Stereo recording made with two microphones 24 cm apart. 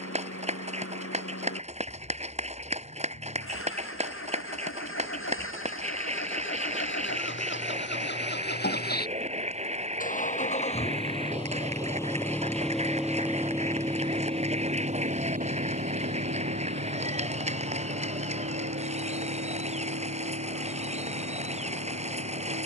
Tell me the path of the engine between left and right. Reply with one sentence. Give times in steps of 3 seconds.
You can hear the engine on the left from 0 s, in the centre from 12 s and on the right from 15 s.